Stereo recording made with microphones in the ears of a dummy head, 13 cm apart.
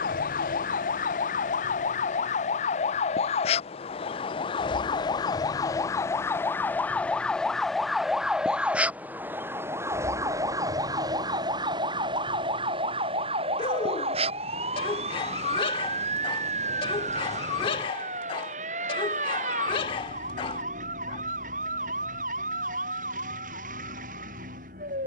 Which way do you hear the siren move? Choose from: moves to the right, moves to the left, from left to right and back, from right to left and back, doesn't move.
moves to the right.